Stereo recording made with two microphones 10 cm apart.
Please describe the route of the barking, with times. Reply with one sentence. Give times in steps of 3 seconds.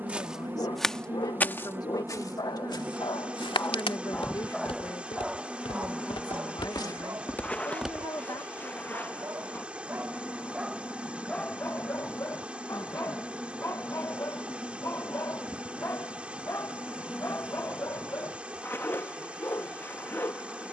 You can hear the barking on the left from 0 s, in the centre from 3 s, on the right from 6 s, in the centre from 9 s and on the left from 12 s.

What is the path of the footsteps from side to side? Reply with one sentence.
In this clip you hear the footsteps move from right to left and back again.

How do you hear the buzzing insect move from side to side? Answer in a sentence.
You can hear the buzzing insect move from right to left.